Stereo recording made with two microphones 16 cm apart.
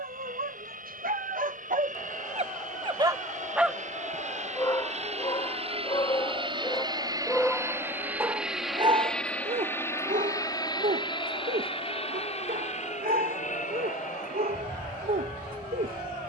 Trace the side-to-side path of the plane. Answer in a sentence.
In this clip you hear the plane move from right to left.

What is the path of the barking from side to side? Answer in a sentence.
In this clip you hear the barking move from right to left and back again.